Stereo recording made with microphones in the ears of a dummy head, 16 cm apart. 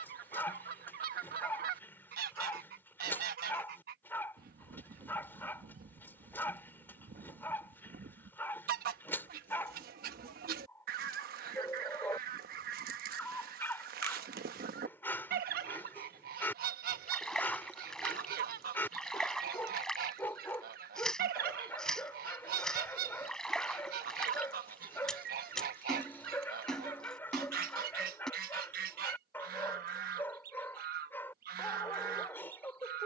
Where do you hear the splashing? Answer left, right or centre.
centre.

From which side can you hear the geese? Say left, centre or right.
right.